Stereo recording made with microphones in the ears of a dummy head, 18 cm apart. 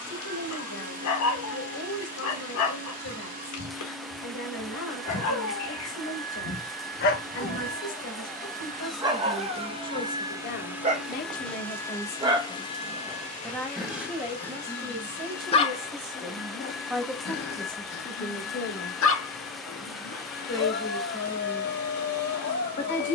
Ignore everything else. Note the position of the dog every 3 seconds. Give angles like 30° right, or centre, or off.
70° left, 70° left, 30° left, 30° right, centre, 40° left, 60° left, 60° left.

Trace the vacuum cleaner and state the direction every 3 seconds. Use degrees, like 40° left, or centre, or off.
40° right, 40° right, 40° right, 10° right, 30° left, 50° left, 50° left, 50° left.